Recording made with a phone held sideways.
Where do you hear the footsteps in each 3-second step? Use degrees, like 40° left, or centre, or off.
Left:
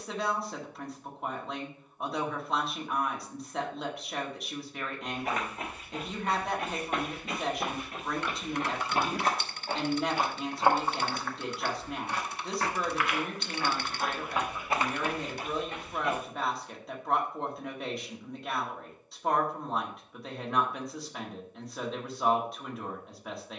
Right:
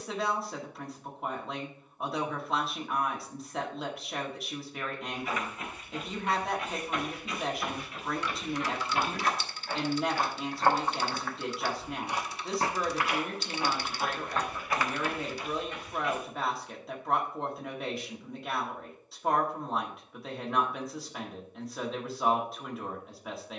off, 60° left, 50° left, 10° left, 10° right, 50° left, off, off.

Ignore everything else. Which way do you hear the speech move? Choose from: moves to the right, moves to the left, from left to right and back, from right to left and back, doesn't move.
doesn't move.